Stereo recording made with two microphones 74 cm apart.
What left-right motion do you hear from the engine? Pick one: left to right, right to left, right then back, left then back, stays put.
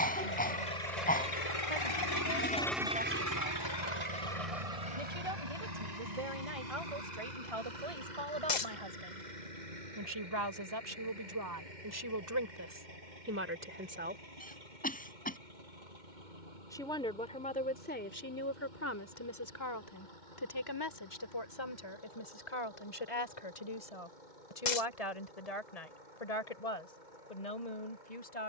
left to right.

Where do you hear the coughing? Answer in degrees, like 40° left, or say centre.
10° left.